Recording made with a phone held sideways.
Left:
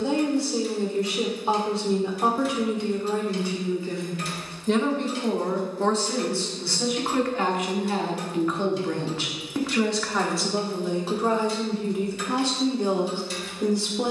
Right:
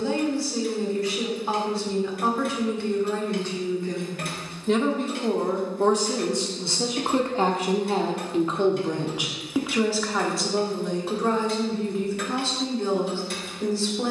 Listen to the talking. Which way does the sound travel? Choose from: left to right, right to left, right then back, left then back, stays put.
right then back.